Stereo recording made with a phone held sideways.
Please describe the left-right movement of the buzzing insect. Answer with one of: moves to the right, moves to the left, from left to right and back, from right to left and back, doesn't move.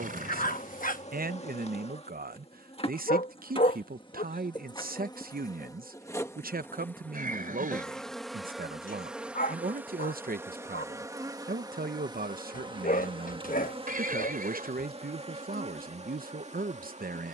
moves to the right.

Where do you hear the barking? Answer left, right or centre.
left.